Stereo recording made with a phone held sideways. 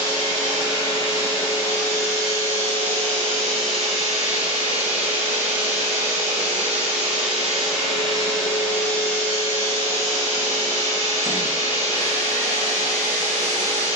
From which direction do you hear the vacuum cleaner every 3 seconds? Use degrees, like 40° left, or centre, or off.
30° left, 10° right, centre, 30° left, 30° left.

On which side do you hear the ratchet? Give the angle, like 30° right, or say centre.
60° left.